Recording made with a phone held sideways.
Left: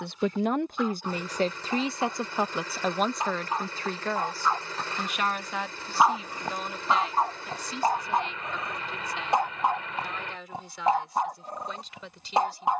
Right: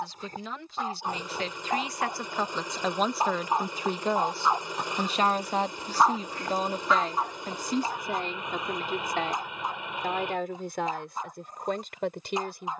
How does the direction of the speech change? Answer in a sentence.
In this clip you hear the speech move from left to right.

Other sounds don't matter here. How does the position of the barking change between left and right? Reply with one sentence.
In this clip you hear the barking move from right to left.